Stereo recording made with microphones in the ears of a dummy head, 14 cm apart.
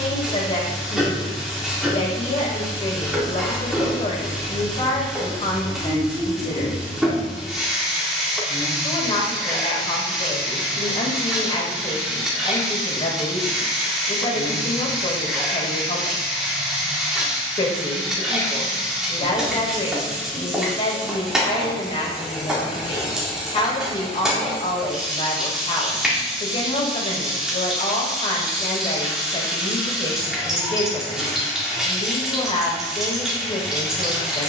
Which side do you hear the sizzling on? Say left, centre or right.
centre.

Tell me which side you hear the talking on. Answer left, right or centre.
left.